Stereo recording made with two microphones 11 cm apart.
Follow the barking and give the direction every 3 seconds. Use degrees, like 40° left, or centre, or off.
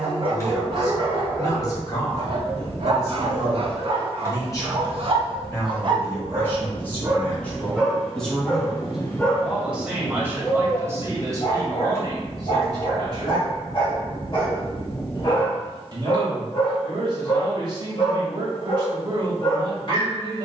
50° right, 50° right, 10° right, 40° left, 50° left, 50° left, 50° left.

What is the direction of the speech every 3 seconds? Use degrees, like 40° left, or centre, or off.
30° left, 30° left, 10° left, 20° right, 40° right, 40° right, 40° right.